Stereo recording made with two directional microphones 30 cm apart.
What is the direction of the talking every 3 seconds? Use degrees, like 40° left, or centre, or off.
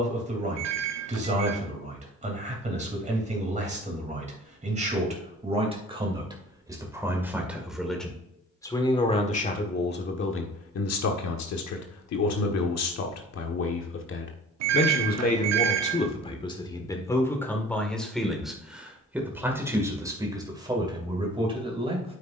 20° right, 20° right, centre, 40° left, 50° left, 20° left, 10° right, 20° right.